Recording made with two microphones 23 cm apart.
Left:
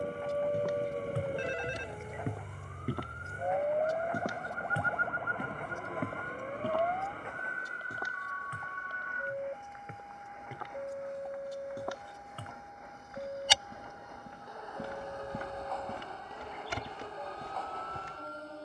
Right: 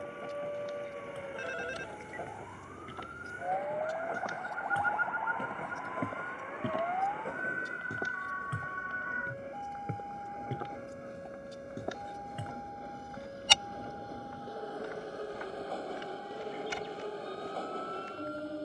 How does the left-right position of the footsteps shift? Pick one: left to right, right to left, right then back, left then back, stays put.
right then back.